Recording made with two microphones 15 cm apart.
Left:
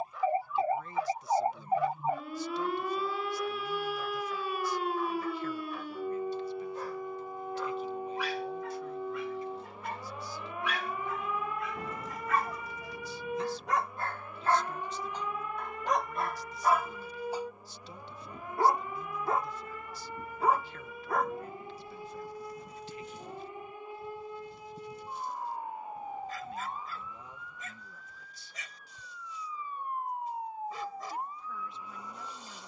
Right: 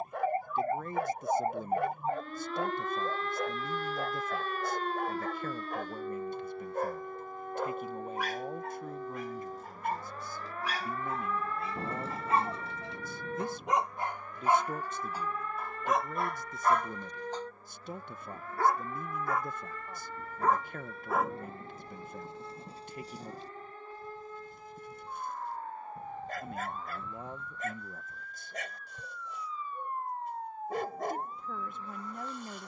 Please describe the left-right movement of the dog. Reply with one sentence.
You can hear the dog go left and come back.